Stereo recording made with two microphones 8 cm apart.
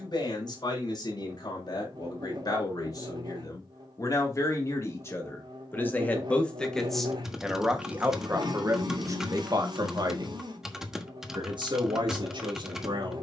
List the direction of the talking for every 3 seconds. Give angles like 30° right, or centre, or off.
50° left, 40° left, 10° right, 60° right, 70° right.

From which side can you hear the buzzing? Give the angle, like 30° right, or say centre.
70° right.